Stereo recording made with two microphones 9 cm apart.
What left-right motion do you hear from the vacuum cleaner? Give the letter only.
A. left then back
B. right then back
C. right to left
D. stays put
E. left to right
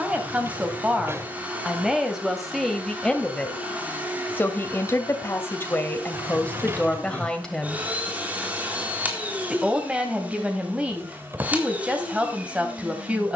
D.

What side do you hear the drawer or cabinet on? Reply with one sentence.
In this clip you hear the drawer or cabinet on the right.